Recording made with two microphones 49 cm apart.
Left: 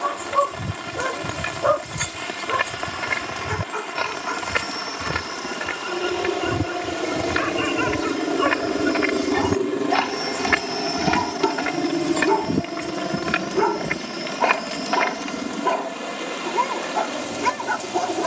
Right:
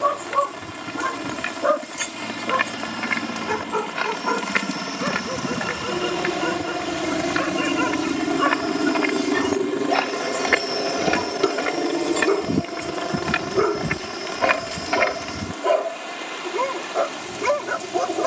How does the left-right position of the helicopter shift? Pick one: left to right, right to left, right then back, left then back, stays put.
right to left.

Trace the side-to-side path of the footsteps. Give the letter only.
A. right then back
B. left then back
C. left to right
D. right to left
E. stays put
C.